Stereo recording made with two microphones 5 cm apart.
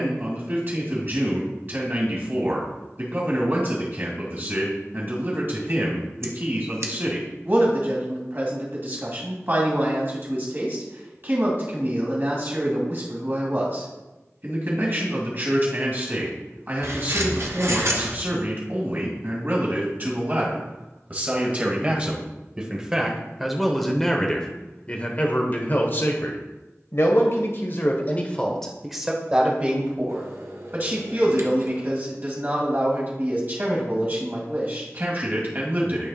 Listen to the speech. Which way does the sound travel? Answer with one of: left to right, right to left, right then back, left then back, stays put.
left then back.